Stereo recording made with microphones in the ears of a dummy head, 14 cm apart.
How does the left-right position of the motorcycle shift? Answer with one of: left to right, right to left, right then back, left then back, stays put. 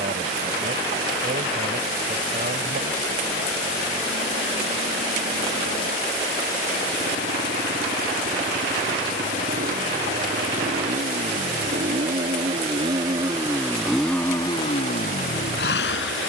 right to left.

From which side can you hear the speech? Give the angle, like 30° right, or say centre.
50° right.